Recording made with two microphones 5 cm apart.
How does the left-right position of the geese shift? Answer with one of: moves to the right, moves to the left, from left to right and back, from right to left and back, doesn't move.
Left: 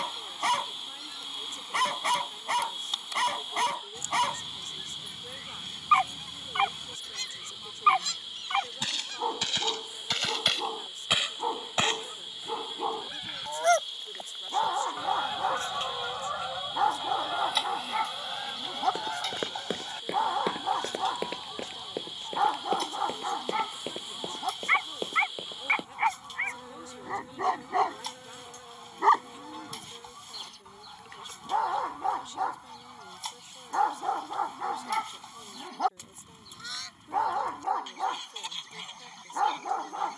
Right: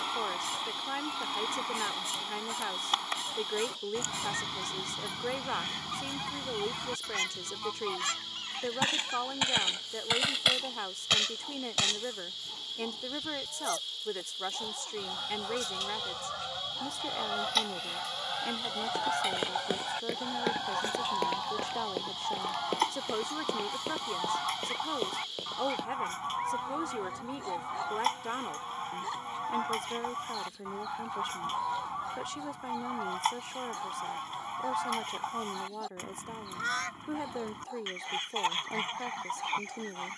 from right to left and back.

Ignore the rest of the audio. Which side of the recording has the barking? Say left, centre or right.
left.